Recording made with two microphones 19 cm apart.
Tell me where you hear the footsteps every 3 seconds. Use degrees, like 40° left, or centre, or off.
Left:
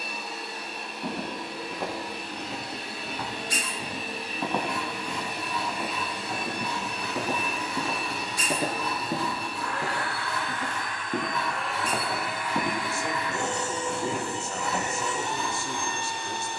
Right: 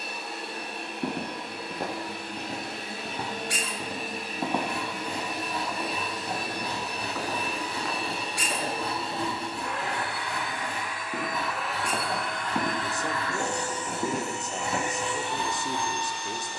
40° right, 10° right, 20° left, 30° left, 30° right, off.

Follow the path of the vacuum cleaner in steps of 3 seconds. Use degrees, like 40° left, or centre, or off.
50° right, 50° right, 30° right, 10° right, 20° left, 50° left.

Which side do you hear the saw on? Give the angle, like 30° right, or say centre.
40° right.